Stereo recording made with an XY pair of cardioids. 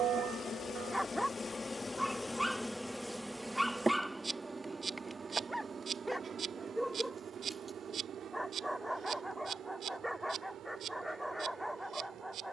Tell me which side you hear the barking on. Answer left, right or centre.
centre.